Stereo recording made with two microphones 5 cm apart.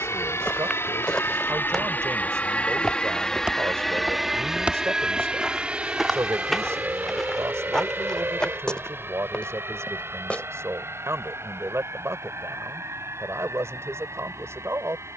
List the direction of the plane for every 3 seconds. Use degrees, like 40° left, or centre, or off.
40° left, 10° right, 30° right, 50° right, 50° right.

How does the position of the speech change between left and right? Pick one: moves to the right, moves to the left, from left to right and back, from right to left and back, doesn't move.
doesn't move.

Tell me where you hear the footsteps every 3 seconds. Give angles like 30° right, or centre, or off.
10° left, 20° right, 10° left, 20° left, off.